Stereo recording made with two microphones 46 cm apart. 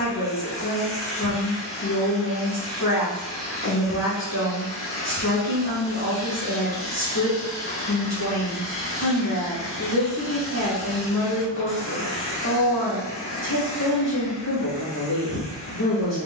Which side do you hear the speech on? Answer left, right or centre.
left.